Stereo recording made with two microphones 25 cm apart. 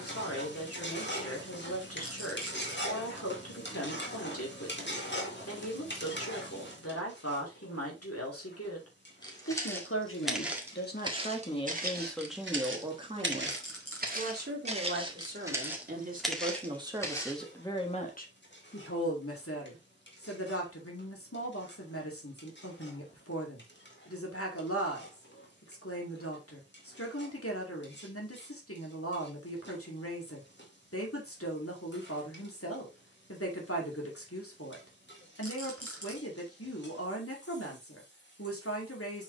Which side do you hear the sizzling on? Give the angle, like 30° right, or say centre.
50° left.